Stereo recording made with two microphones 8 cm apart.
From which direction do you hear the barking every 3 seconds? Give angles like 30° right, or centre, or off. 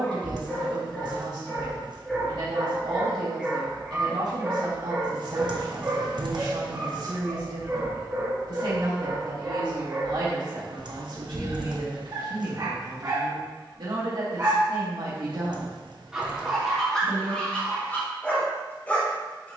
10° left, 10° right, 30° right, 50° right, 40° right, centre, 20° left.